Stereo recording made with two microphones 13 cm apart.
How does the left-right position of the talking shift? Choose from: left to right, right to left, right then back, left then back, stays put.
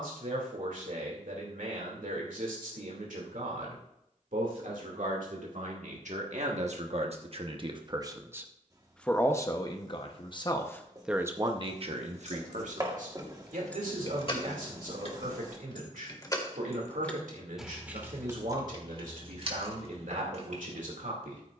left then back.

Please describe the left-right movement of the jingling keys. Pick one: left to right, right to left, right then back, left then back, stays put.
left then back.